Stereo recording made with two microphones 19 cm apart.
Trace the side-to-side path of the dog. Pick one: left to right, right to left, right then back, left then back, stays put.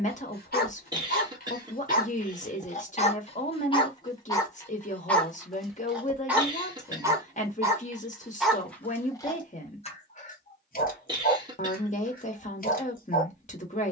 right then back.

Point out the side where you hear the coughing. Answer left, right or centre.
right.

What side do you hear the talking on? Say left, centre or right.
left.